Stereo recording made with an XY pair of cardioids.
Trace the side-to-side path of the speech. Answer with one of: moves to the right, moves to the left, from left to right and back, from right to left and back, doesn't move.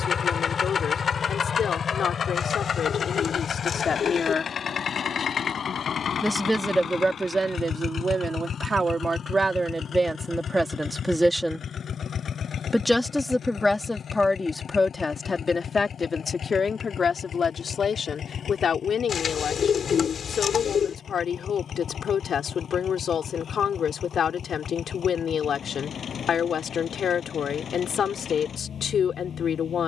from left to right and back.